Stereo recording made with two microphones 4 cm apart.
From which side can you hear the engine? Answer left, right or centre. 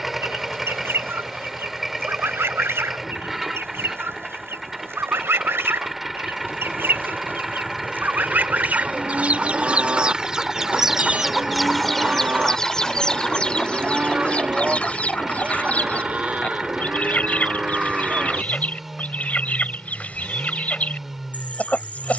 centre.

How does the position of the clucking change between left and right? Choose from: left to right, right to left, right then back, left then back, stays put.
right to left.